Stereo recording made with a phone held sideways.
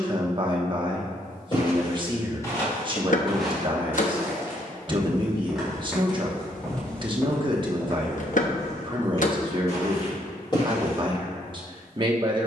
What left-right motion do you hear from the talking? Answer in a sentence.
You can hear the talking stay in one place.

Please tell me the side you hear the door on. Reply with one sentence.
In this clip you hear the door on the left.